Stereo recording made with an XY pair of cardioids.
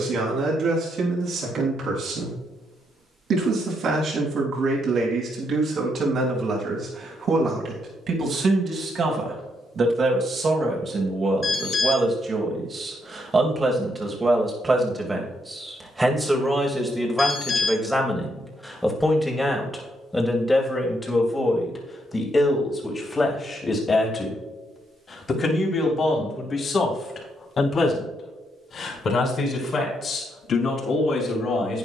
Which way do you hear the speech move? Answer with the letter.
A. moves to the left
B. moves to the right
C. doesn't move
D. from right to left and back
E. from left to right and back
A.